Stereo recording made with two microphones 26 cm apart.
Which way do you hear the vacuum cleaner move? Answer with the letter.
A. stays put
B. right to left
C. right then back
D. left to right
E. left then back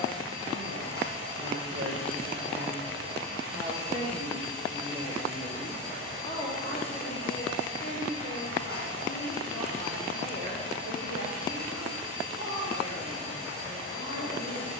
A.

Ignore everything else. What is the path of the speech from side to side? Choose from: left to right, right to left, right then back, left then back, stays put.
right to left.